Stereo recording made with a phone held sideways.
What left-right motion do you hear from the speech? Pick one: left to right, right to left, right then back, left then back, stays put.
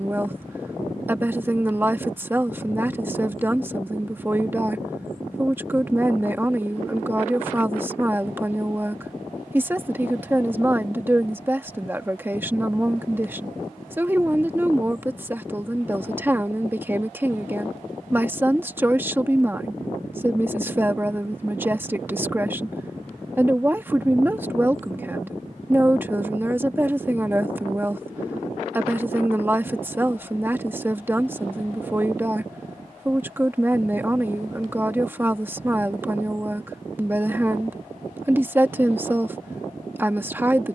stays put.